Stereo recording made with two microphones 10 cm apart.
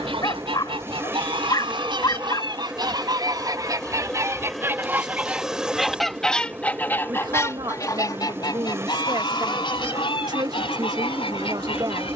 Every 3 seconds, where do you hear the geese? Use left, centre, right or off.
right, right, left, left.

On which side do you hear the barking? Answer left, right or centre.
left.